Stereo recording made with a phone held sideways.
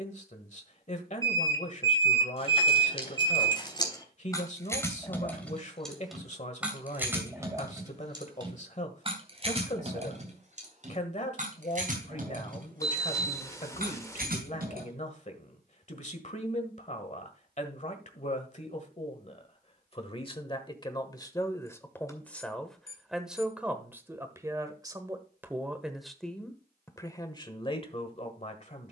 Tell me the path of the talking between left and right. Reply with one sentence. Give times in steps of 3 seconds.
You can hear the talking on the left from 0 s, in the centre from 21 s and on the left from 27 s.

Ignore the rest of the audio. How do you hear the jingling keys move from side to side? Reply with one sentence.
You can hear the jingling keys travel towards the right.